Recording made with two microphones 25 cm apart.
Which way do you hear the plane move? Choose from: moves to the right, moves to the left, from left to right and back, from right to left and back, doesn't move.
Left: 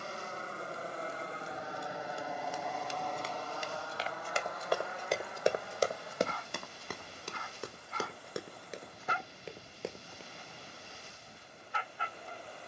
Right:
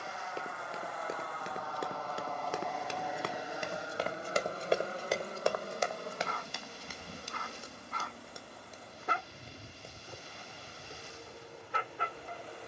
moves to the right.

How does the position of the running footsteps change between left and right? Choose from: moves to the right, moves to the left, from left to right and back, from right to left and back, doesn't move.
moves to the left.